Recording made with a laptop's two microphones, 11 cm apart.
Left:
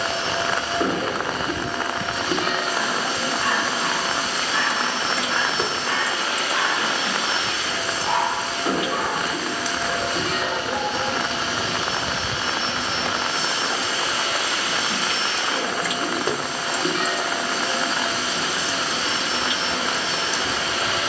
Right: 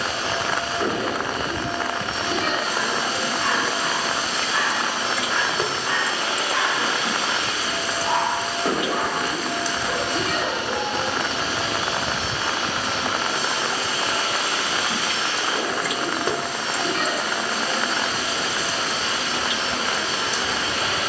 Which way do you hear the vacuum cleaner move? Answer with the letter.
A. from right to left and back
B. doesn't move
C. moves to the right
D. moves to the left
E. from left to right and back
E.